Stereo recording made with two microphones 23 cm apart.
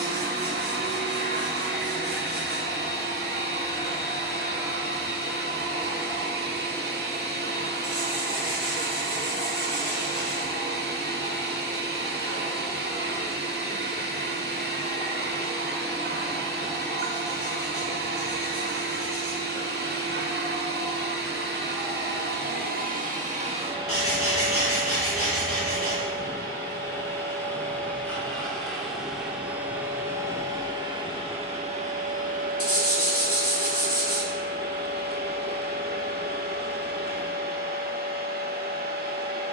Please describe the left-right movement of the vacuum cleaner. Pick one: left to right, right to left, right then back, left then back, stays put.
left then back.